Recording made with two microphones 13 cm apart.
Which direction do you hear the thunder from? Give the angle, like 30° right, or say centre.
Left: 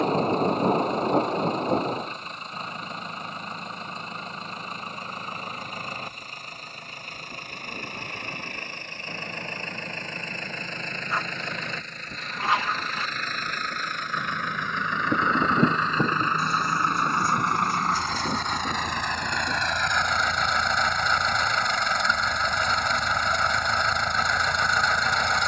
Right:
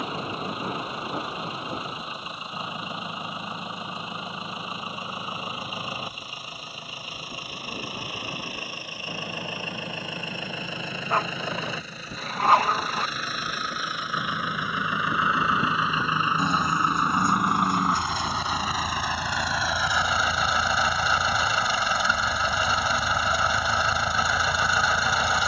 40° left.